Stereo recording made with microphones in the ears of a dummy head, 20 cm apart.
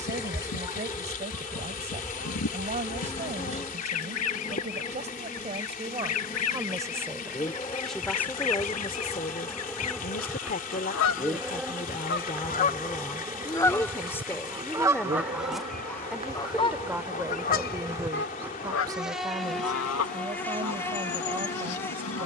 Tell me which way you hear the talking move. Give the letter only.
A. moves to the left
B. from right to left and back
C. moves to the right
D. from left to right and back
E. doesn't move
B.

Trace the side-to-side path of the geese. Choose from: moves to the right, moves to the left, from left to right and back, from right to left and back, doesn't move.
from left to right and back.